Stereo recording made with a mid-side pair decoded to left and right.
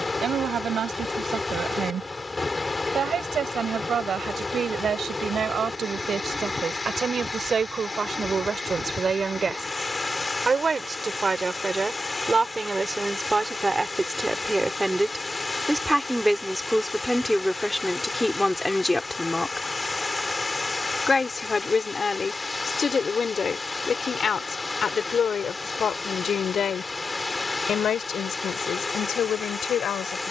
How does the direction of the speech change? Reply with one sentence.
In this clip you hear the speech move from right to left.